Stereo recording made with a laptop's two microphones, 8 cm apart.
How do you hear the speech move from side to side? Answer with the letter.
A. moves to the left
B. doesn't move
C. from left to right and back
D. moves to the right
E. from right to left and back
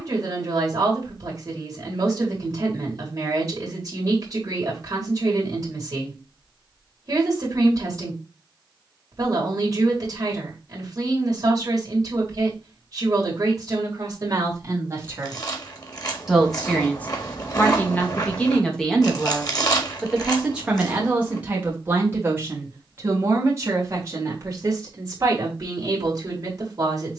E.